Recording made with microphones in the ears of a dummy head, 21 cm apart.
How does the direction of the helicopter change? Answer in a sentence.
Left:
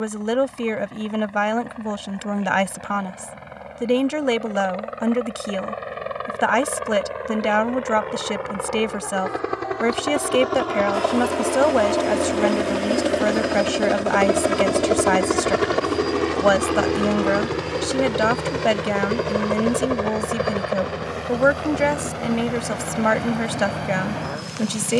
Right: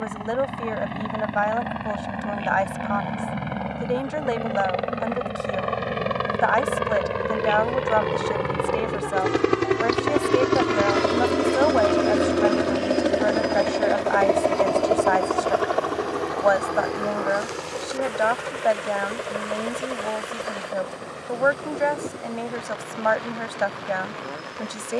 You can hear the helicopter travel towards the left.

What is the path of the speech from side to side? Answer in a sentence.
You can hear the speech stay put.